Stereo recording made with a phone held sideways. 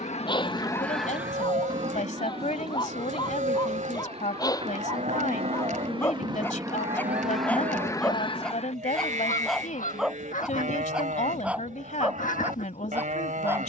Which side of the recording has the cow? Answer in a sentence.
You can hear the cow on the right.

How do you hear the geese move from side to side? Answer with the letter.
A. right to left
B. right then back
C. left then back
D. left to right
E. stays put
B.